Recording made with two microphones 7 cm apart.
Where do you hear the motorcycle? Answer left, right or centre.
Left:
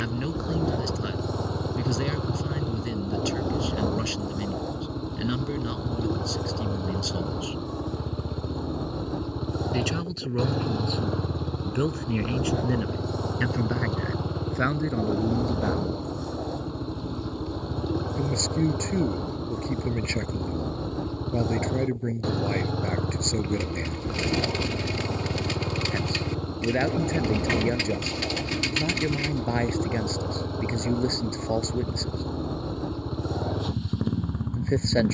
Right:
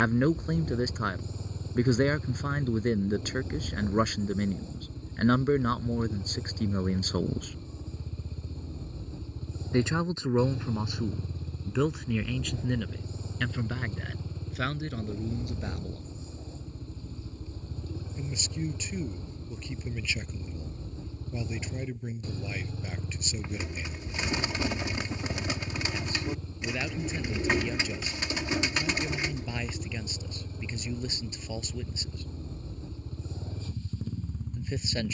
left.